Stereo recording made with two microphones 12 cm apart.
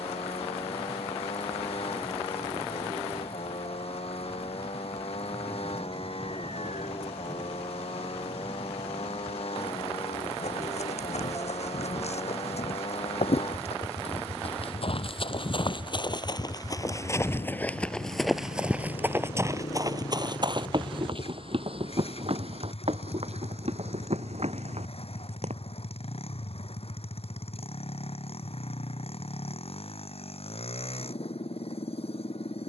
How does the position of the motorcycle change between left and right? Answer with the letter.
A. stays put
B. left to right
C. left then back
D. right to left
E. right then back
A.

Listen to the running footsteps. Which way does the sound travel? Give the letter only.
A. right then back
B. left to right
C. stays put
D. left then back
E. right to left
B.